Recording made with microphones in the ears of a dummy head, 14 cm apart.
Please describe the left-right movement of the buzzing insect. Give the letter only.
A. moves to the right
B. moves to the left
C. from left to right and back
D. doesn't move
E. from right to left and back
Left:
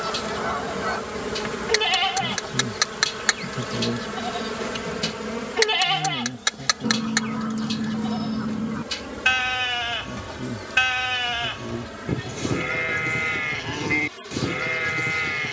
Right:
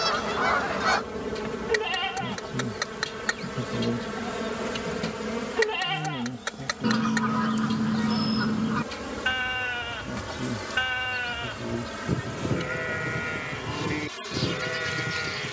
A.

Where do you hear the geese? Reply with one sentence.
In this clip you hear the geese on the right.